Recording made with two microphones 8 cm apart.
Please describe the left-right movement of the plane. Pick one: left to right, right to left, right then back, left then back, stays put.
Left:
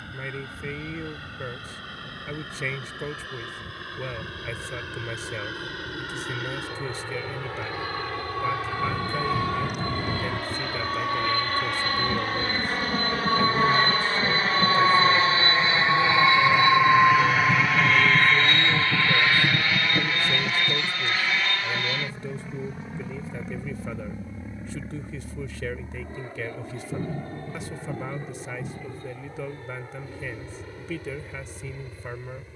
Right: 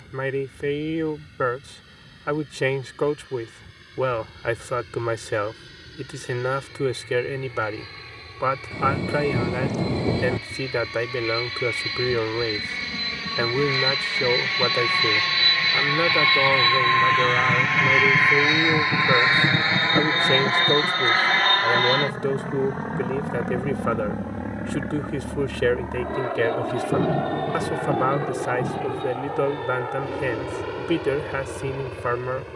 left to right.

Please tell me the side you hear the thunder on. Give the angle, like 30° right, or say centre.
80° right.